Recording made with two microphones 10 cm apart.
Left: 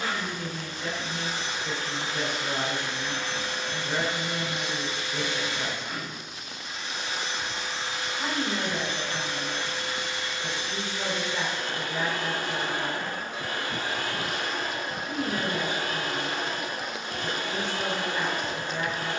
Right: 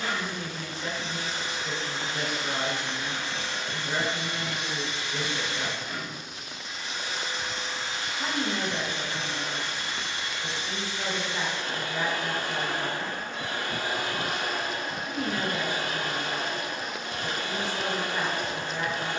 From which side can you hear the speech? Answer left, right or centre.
centre.